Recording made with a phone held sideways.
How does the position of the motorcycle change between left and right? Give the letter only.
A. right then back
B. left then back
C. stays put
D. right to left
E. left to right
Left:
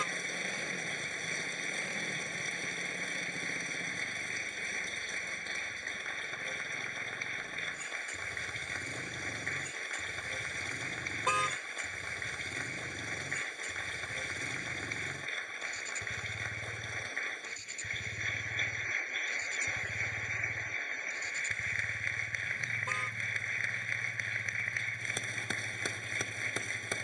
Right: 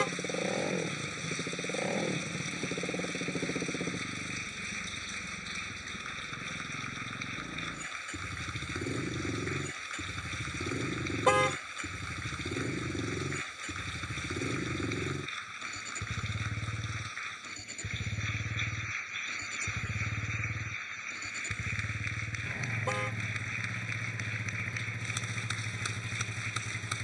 C.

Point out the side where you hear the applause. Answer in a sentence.
You can hear the applause on the left.